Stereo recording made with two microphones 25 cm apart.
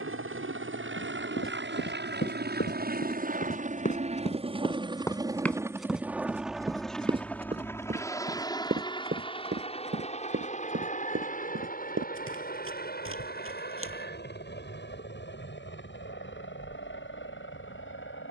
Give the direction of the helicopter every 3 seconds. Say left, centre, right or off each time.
right, right, centre, left, left, left.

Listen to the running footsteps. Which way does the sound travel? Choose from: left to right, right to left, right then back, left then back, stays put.
left to right.